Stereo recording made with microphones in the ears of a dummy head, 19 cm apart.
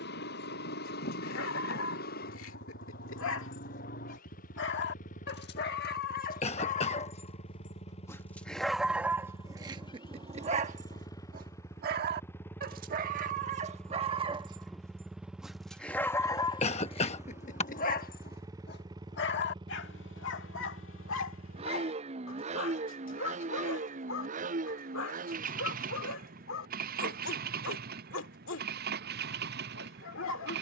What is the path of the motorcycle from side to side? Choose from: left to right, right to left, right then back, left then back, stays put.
left to right.